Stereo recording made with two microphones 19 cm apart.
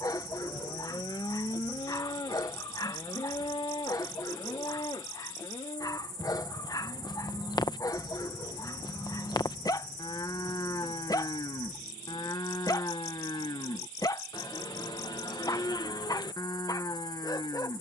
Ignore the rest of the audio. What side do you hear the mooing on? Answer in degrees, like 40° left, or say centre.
20° left.